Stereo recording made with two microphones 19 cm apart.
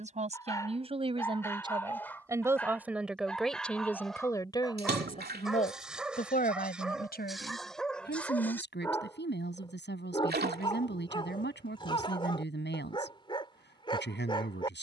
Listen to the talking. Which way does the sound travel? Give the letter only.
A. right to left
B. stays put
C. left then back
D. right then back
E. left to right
A.